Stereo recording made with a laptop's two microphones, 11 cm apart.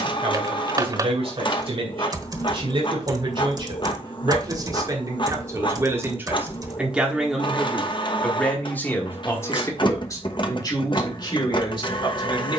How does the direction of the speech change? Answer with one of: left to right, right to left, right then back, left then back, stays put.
right to left.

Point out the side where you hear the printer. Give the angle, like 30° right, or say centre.
40° left.